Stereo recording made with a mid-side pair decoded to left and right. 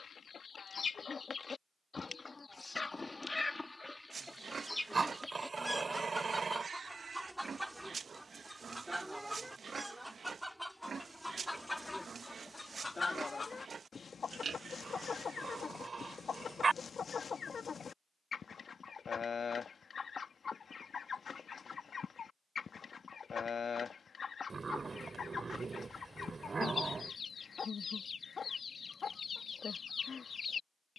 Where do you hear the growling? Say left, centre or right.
right.